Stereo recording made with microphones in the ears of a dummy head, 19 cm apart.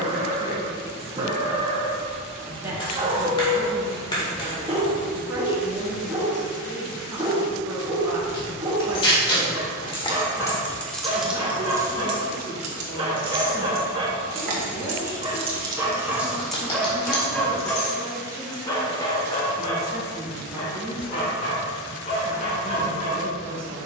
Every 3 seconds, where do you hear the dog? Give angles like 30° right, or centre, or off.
20° right, 20° right, 20° right, 20° right, 20° right, centre, 20° left, 40° left.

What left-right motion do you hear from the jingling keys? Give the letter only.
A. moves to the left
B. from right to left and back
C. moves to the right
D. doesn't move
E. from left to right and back
E.